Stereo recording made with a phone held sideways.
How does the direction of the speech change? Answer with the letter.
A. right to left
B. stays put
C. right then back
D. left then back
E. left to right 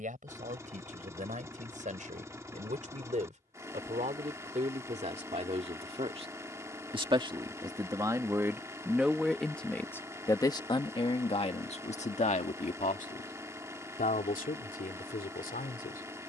A.